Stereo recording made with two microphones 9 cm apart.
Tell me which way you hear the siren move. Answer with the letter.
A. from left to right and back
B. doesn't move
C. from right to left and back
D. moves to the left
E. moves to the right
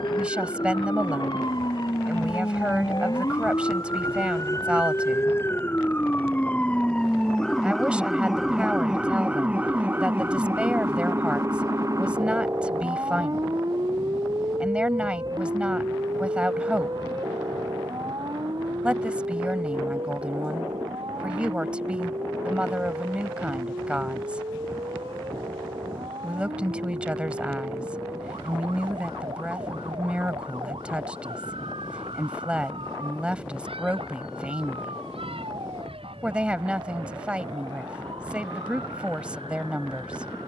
E.